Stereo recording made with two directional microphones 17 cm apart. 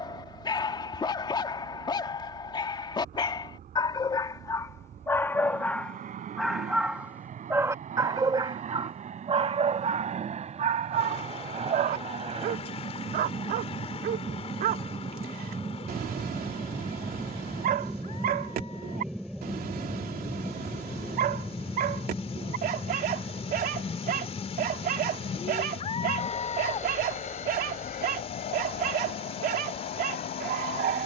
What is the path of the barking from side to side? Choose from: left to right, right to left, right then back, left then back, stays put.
left to right.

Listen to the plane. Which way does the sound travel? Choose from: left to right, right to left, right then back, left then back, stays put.
right to left.